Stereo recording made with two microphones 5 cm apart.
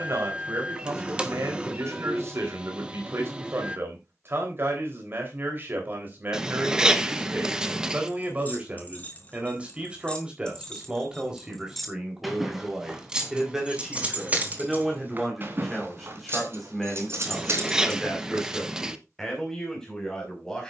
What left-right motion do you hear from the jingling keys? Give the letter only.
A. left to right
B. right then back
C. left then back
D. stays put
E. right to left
A.